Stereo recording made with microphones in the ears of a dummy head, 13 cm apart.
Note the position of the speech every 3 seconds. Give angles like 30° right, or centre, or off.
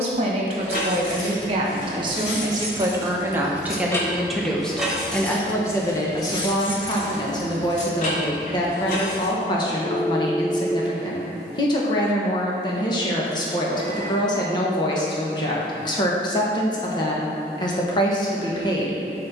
40° right, centre, 30° left, 30° left, 30° left, 30° left, 30° left.